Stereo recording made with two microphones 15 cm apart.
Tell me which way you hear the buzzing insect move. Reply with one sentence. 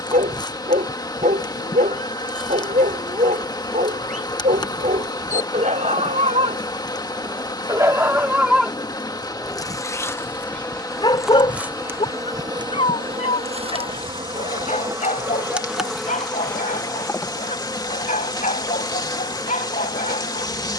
You can hear the buzzing insect move from left to right and back again.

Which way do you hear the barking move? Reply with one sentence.
You can hear the barking go from the right side to the left.